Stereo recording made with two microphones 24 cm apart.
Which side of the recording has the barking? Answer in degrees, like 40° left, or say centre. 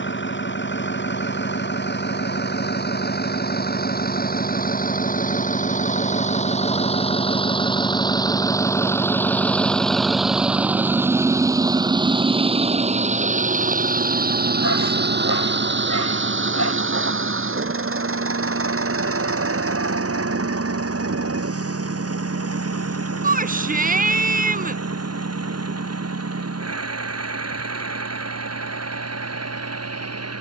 80° left.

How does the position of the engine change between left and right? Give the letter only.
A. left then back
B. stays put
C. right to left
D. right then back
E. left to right
E.